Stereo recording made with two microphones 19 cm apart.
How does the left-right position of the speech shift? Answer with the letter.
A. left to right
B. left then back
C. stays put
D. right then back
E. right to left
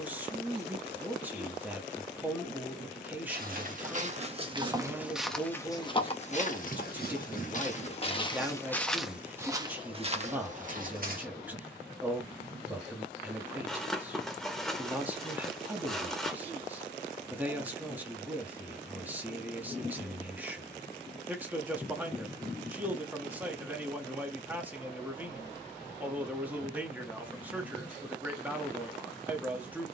C.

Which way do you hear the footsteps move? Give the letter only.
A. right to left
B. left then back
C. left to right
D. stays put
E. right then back
B.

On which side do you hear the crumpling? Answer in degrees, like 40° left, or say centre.
centre.